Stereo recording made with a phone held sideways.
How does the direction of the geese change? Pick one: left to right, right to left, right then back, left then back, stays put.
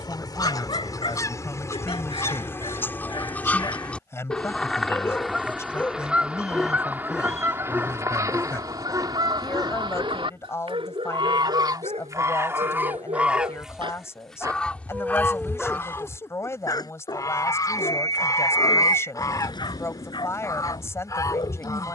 right then back.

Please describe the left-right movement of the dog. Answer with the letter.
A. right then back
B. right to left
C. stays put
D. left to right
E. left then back
A.